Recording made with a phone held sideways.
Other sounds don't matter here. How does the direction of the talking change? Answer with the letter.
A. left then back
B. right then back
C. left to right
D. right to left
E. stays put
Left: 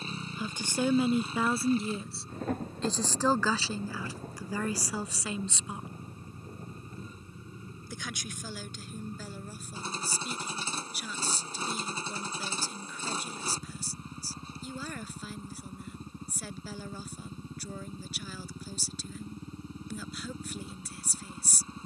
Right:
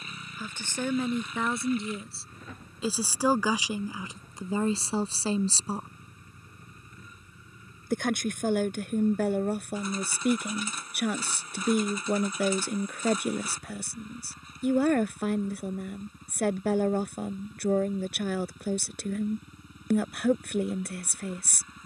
C.